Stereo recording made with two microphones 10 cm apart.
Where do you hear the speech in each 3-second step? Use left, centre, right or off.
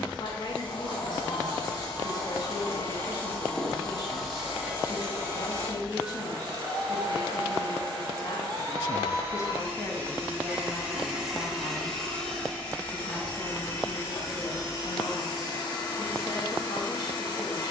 left, left, left, centre, left, left.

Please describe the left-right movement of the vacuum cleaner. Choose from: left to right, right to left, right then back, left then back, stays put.
right then back.